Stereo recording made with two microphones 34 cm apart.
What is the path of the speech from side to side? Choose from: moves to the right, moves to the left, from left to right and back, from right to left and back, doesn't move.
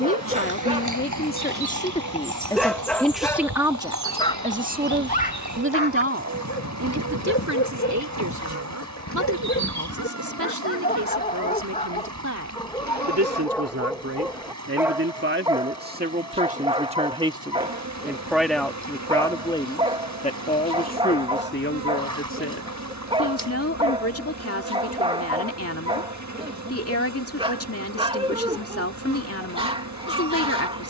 from left to right and back.